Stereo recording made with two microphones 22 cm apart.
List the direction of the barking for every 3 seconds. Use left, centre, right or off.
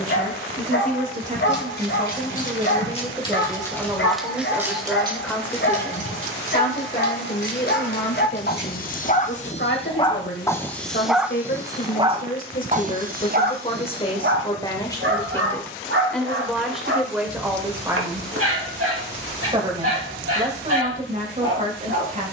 left, left, left, centre, right, right, right, right.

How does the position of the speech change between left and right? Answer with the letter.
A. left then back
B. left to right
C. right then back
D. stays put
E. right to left
A.